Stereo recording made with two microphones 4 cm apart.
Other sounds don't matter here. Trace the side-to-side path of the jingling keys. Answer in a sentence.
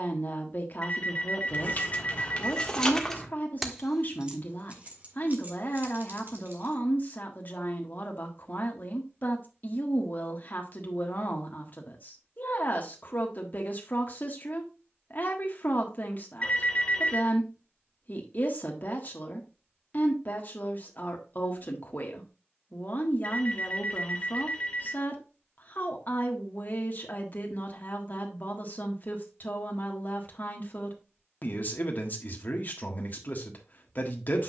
In this clip you hear the jingling keys go from the left side to the right.